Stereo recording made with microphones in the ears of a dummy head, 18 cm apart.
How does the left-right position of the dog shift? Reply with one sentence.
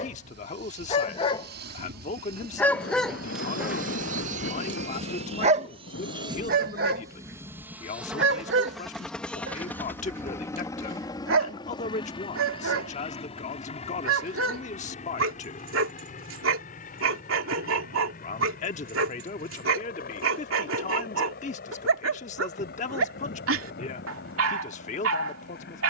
In this clip you hear the dog travel towards the right.